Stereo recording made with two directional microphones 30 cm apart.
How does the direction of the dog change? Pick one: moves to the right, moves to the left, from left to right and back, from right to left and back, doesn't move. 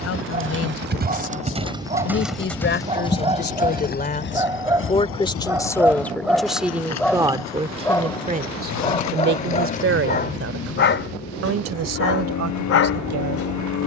moves to the left.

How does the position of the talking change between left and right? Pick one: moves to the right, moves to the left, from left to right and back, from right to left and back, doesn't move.
moves to the right.